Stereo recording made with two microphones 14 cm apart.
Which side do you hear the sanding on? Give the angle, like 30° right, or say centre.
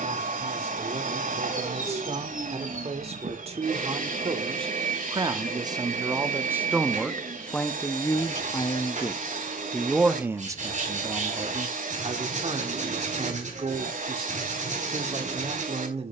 60° right.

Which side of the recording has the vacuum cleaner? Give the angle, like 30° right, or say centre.
70° right.